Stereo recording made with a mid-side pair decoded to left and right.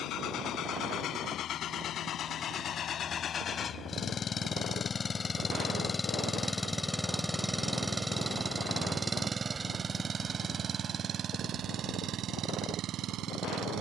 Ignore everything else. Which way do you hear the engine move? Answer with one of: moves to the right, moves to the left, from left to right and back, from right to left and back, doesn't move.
moves to the right.